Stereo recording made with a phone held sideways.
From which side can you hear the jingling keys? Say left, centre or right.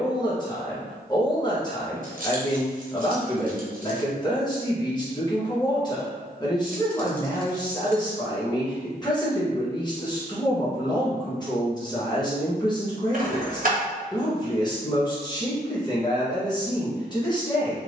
right.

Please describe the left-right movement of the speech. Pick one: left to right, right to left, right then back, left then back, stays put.
stays put.